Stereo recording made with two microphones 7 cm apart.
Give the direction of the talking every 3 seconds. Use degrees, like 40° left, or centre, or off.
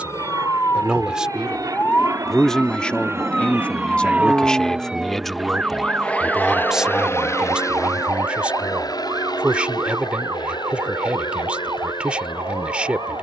centre, 10° left, 10° right, 10° right, 10° right.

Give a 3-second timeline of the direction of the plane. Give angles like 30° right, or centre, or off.
50° right, 20° right, 40° left, 60° left, 70° left.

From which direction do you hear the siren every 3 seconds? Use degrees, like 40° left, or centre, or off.
20° left, 10° right, 30° right, 50° right, 50° right.